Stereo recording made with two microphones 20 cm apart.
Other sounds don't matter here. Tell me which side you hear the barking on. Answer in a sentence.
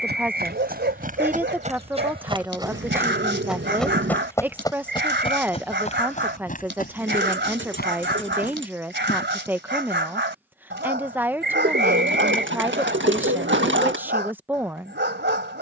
In this clip you hear the barking on the right.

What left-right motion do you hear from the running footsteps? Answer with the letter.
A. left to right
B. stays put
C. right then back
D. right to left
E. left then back
D.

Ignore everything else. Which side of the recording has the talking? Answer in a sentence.
In this clip you hear the talking in the centre.